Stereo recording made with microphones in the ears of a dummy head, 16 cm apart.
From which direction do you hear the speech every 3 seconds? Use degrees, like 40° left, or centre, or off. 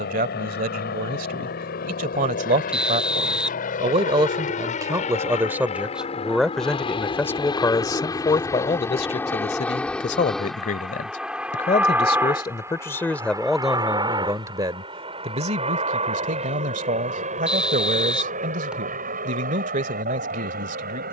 40° right, 20° right, 10° left, 40° left, centre, 40° right, 40° right.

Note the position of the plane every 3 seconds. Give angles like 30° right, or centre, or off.
60° left, 40° left, 20° left, centre, 20° right, 30° right, 40° right.